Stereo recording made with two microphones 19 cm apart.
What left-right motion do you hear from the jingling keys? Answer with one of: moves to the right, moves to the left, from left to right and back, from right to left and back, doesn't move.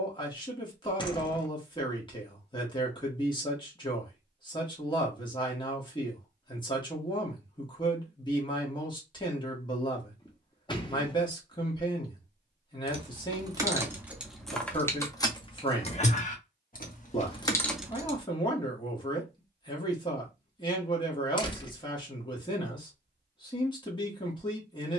from right to left and back.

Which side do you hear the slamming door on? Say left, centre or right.
left.